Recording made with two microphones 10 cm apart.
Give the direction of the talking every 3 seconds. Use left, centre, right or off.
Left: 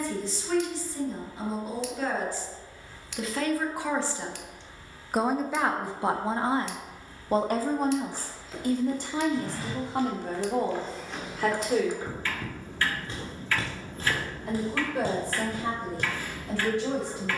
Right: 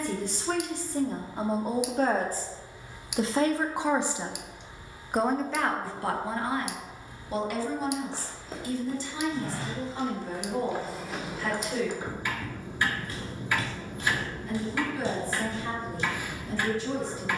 right, centre, left, left, left, left.